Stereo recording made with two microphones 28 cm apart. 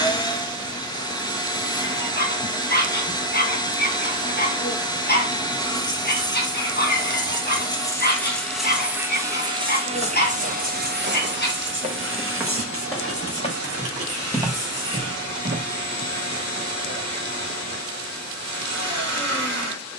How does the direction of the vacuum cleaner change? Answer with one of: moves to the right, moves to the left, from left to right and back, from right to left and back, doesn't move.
moves to the right.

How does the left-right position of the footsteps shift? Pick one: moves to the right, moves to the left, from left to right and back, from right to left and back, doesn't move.
from right to left and back.